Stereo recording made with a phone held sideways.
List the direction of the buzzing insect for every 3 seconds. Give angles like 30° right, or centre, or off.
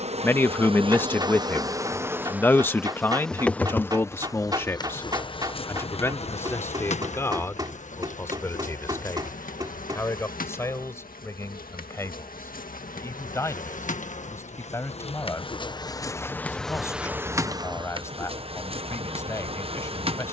20° right, 20° left, 50° left, 60° left, 60° left, 10° left, 40° right.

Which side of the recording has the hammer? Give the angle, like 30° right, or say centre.
30° right.